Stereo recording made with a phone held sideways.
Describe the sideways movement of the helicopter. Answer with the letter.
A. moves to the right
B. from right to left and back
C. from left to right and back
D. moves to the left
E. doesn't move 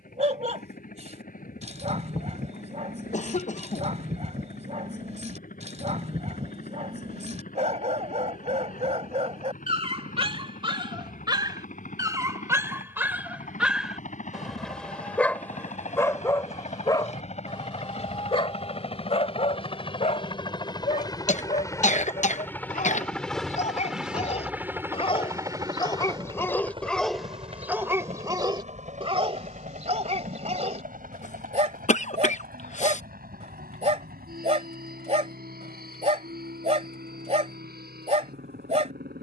A.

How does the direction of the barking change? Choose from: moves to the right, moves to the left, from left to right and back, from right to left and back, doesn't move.
from right to left and back.